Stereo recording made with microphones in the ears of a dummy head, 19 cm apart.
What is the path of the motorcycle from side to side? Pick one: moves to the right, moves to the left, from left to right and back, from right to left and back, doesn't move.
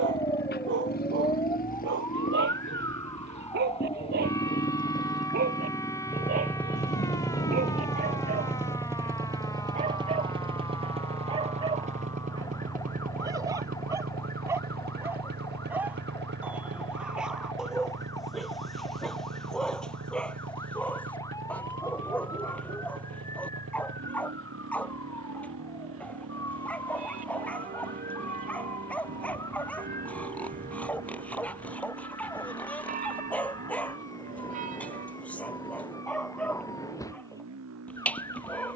moves to the right.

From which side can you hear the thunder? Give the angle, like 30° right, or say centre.
30° left.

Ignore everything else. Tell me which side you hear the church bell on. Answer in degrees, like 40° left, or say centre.
40° right.